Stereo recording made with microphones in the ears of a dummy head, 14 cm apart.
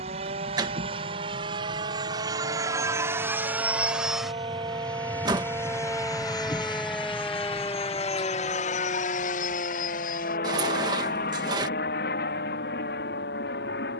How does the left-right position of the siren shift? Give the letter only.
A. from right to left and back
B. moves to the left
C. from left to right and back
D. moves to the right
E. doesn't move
B.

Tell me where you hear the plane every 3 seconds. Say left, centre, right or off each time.
right, centre, left, left, left.